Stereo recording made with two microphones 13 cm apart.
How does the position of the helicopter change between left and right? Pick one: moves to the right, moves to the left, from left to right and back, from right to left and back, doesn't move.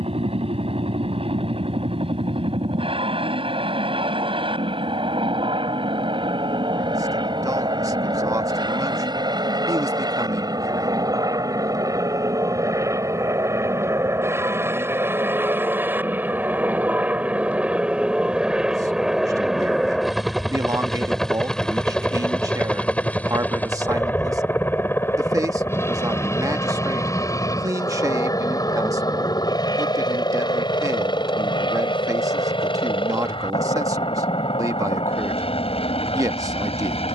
moves to the left.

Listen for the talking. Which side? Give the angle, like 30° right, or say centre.
30° right.